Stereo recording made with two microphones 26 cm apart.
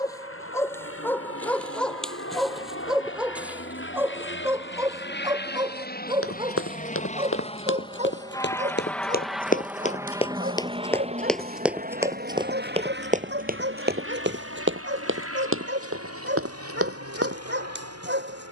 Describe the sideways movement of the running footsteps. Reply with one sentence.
You can hear the running footsteps go from the left side to the right.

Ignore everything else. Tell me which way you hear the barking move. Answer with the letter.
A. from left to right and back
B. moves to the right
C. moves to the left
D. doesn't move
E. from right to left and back
B.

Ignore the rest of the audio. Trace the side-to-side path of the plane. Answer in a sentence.
In this clip you hear the plane move from left to right.